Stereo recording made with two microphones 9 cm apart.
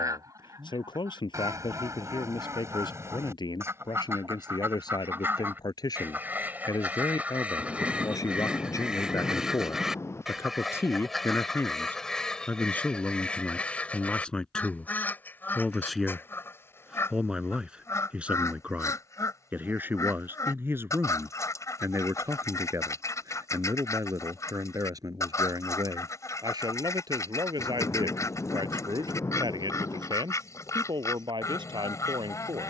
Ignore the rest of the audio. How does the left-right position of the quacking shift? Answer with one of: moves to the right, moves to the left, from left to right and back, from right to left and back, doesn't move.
moves to the left.